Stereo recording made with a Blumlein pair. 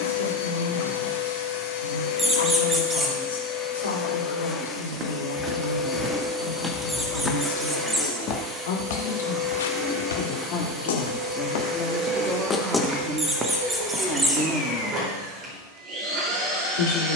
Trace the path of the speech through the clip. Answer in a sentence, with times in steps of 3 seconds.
In this clip you hear the speech on the left from 0 s, in the centre from 12 s and on the left from 15 s.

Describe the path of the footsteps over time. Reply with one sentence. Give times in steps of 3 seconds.
You can hear the footsteps not at all from 0 s, on the right from 3 s, in the centre from 6 s, on the left from 9 s, in the centre from 12 s and not at all from 15 s.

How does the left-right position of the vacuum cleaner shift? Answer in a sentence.
You can hear the vacuum cleaner travel towards the right.